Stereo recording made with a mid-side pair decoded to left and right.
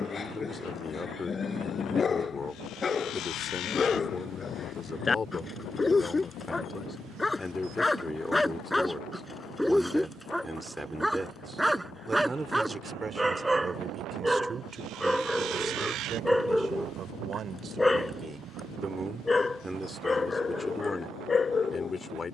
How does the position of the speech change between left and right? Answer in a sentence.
In this clip you hear the speech go right and come back.